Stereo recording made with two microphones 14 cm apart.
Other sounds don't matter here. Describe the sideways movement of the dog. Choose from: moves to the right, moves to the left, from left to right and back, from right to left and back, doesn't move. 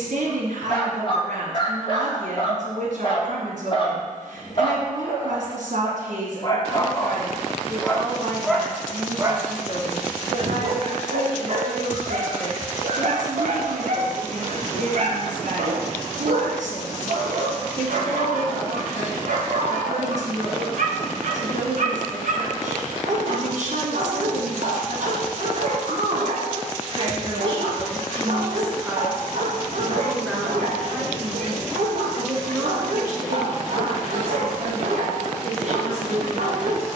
moves to the right.